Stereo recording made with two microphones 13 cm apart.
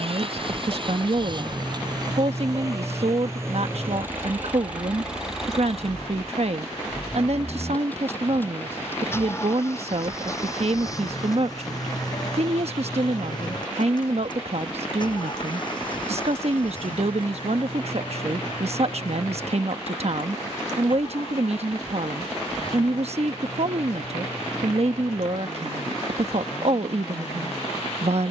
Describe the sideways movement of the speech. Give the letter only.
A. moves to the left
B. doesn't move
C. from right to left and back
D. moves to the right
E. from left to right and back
B.